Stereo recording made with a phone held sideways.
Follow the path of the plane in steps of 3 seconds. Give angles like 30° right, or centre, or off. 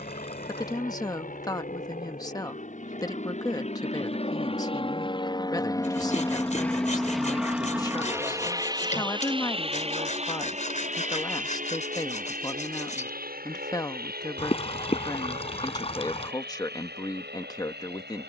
60° left, 40° left, centre, 40° right, 60° right, 70° right.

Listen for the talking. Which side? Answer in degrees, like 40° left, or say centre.
20° left.